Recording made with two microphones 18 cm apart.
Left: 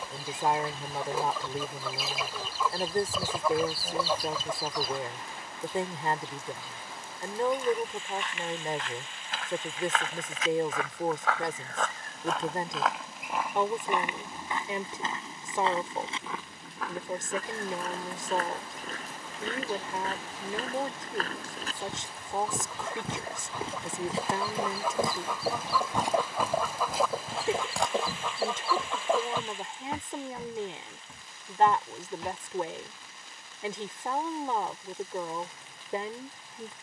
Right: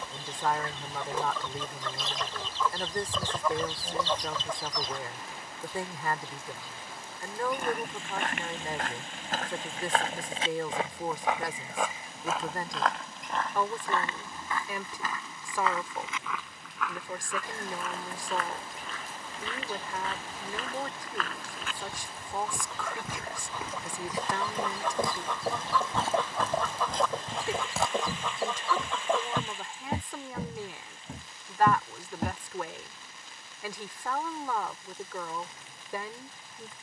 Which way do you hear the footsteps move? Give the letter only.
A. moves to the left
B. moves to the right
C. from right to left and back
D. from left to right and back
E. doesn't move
C.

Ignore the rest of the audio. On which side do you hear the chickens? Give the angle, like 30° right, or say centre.
10° left.